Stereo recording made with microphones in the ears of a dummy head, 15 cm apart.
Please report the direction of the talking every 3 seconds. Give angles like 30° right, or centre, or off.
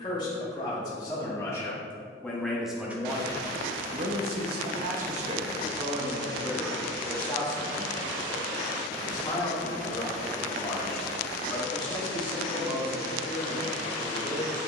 10° left, 40° right, 10° left, 30° left, 30° left.